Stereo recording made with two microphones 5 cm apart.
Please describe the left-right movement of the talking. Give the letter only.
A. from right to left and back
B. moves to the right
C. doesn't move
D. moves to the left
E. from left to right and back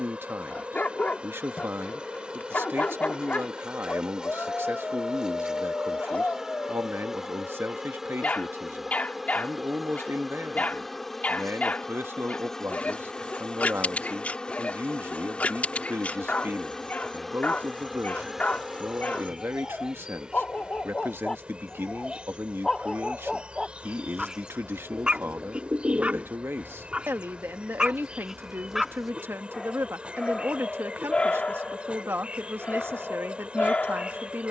C.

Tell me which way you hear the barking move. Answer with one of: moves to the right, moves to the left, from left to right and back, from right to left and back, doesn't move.
from left to right and back.